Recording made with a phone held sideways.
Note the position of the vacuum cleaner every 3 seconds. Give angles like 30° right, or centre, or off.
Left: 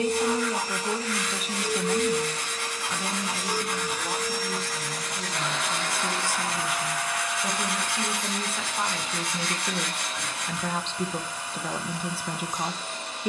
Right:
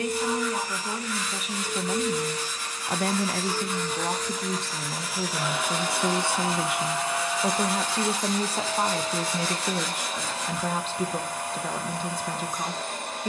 30° left, centre, 30° right, 50° right, 50° right.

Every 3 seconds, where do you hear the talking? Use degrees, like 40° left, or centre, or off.
centre, 70° right, 50° right, 10° right, 10° left.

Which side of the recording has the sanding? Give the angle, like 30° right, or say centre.
80° left.